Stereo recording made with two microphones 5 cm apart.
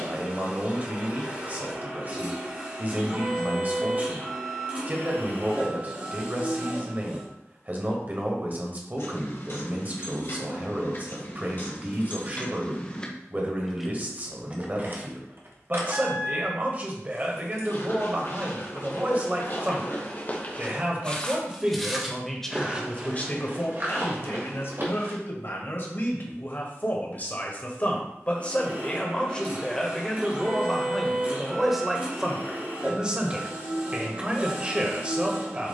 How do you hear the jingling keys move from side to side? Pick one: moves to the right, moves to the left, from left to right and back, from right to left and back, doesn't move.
moves to the right.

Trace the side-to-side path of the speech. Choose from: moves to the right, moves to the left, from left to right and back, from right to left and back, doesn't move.
from right to left and back.